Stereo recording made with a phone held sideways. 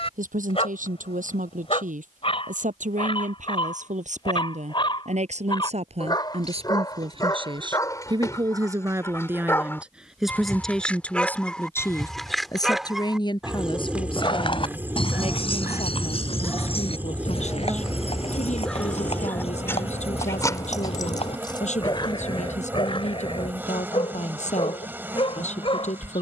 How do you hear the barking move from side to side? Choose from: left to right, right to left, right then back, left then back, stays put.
right then back.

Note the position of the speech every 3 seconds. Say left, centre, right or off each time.
right, right, right, centre, left, left, left, left, left.